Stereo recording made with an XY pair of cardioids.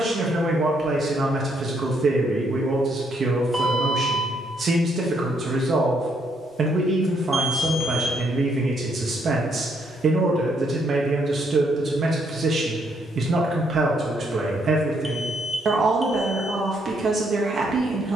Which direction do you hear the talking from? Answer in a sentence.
In this clip you hear the talking on the right.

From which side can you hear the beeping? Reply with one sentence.
In this clip you hear the beeping in the centre.